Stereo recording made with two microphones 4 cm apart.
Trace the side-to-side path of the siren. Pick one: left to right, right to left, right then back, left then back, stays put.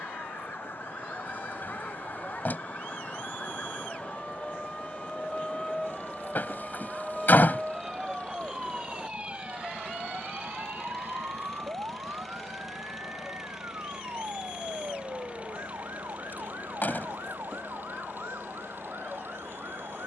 left to right.